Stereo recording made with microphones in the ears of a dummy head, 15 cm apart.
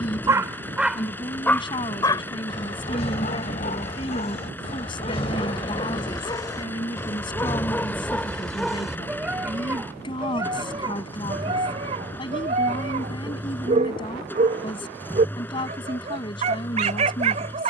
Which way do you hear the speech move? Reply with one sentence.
In this clip you hear the speech stay in one place.